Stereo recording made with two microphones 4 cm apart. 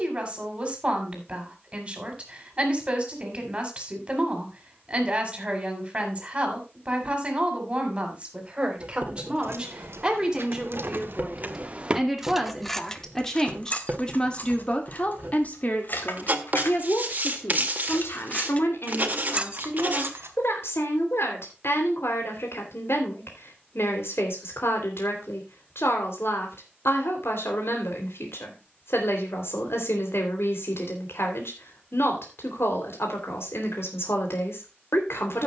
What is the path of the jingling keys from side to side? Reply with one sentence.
In this clip you hear the jingling keys go left and come back.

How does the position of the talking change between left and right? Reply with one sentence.
You can hear the talking move from right to left.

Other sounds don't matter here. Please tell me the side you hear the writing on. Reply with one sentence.
In this clip you hear the writing on the right.